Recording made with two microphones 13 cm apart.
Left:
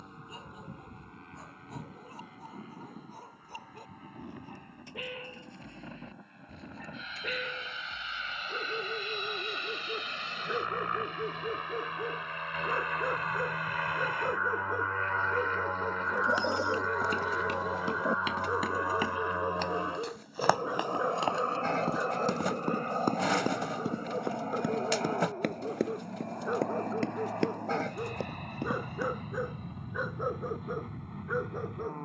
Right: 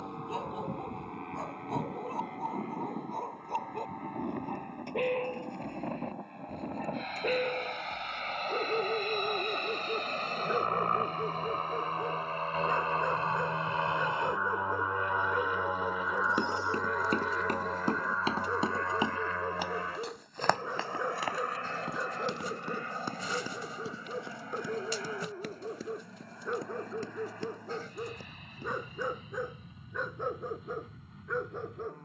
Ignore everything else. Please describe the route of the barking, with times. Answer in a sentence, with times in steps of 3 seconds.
You can hear the barking on the right from 0 s and in the centre from 9 s.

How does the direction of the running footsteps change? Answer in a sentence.
You can hear the running footsteps move from right to left.